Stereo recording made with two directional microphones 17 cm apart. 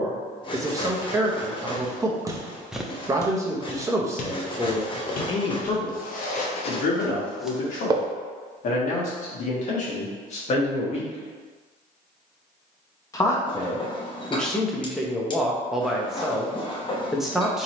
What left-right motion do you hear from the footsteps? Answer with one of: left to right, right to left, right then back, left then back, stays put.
left then back.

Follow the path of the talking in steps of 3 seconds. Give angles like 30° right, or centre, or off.
20° right, centre, 50° left, 40° left, 10° left, centre.